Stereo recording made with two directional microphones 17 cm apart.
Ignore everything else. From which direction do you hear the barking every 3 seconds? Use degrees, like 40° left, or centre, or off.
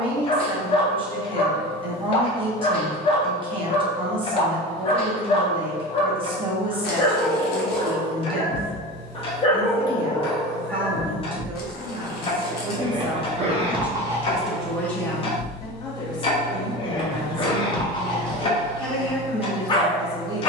30° left, 30° left, 30° left, 10° left, 20° right, 30° left, 30° left.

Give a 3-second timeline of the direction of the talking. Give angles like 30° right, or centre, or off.
30° right, 30° right, 30° right, 30° right, 10° right, 20° left, 10° right.